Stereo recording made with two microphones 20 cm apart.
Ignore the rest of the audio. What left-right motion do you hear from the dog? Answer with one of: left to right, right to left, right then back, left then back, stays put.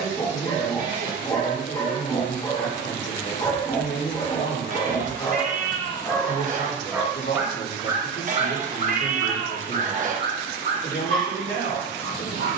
left to right.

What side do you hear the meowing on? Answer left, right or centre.
right.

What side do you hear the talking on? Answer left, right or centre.
left.